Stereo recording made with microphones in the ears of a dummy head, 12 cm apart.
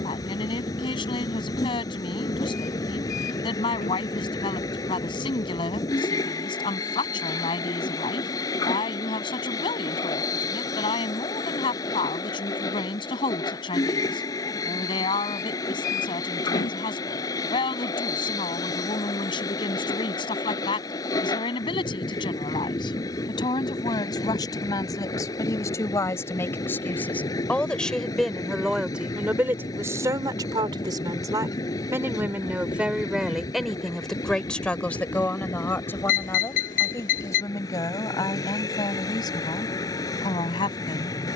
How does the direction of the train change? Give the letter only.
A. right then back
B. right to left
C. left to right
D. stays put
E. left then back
D.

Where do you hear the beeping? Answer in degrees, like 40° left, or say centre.
60° left.